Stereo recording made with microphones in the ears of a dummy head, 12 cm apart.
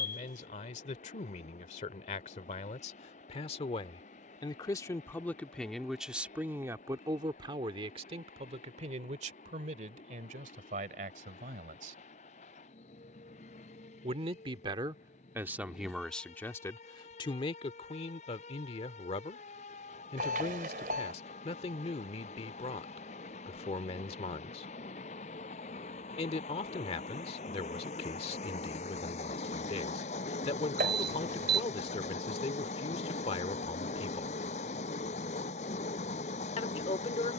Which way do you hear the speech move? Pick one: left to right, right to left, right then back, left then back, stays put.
right then back.